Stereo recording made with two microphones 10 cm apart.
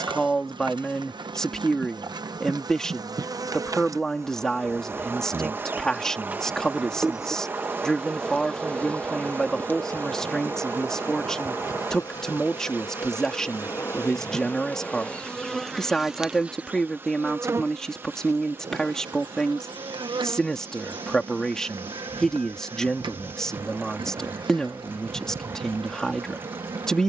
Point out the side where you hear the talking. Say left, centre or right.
centre.